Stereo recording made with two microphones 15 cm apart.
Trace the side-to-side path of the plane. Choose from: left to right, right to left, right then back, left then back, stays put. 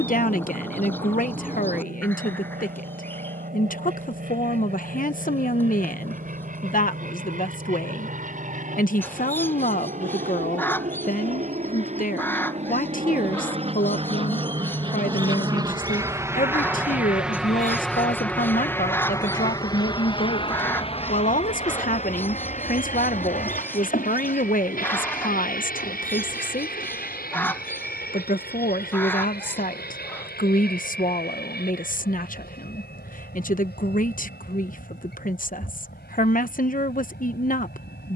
right to left.